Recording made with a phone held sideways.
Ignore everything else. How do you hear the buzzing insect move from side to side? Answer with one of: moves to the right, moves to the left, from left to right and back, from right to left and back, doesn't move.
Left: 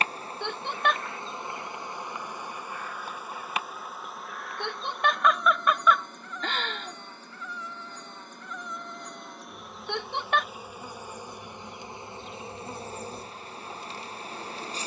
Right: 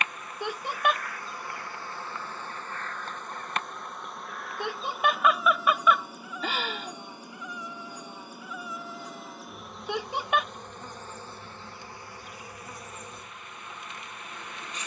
from left to right and back.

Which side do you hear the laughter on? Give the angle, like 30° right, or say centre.
10° right.